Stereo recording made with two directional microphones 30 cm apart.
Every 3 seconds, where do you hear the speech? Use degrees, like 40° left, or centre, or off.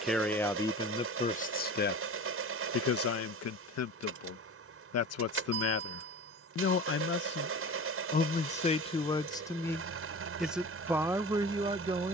20° left, 50° left, 30° left, centre.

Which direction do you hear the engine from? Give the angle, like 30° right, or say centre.
50° right.